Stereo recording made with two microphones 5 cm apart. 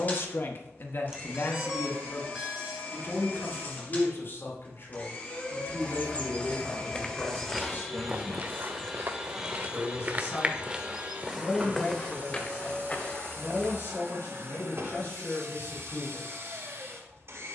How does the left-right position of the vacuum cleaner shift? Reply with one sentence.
You can hear the vacuum cleaner travel towards the right.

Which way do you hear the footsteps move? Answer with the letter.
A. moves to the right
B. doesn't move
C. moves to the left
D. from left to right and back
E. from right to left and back
D.